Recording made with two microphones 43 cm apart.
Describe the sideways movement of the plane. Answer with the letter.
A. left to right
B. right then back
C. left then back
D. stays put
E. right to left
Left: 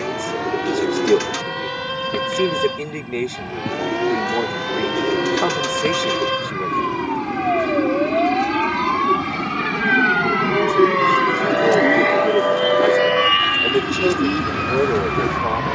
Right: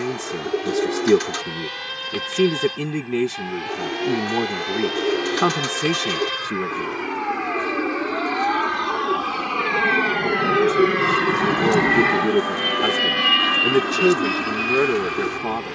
A.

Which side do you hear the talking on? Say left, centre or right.
right.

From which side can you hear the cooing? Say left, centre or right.
left.